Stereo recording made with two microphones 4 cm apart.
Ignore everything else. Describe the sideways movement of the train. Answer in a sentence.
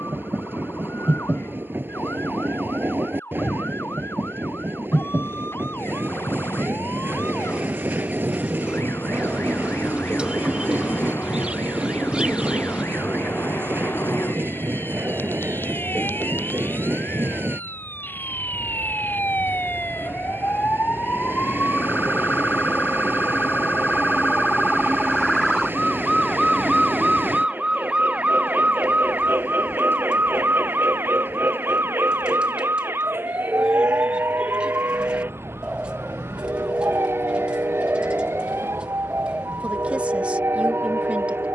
In this clip you hear the train stay put.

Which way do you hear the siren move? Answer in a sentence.
You can hear the siren move to the right.